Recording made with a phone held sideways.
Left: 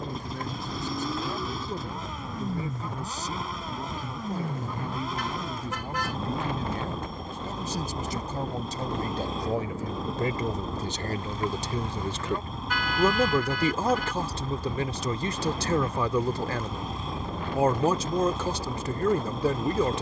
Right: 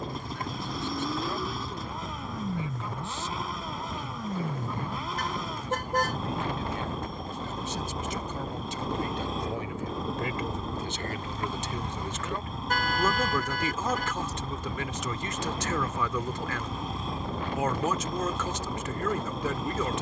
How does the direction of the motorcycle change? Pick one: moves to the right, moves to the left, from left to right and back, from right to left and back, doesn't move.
doesn't move.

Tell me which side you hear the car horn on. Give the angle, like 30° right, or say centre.
50° right.